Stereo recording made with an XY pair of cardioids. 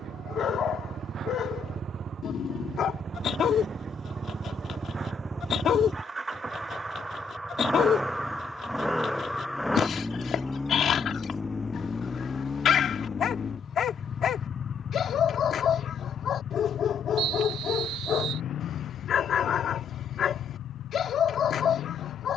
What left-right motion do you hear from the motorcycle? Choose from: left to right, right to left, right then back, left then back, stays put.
right to left.